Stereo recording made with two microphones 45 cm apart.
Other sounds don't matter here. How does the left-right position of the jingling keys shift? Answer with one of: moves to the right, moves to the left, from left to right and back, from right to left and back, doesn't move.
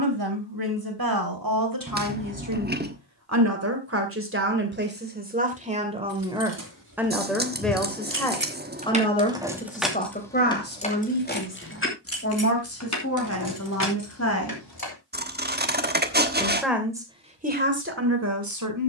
moves to the left.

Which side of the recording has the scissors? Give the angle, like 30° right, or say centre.
20° right.